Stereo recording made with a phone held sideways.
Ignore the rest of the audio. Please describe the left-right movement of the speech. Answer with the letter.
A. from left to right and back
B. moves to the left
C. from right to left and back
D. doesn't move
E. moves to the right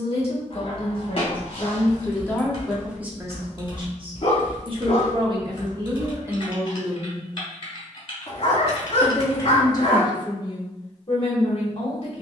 A.